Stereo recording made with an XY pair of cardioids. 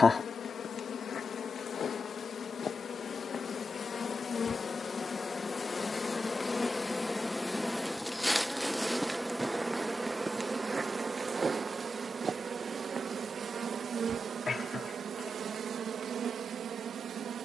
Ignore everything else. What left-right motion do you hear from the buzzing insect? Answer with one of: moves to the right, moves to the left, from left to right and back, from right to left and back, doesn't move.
moves to the right.